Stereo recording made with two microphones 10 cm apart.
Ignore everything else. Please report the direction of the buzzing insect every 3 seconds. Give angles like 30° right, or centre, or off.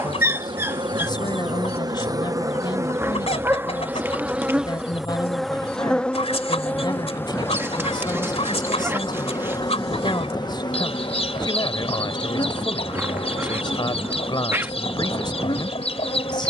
40° right, 10° right, 20° left, 40° left, 50° left, 60° left.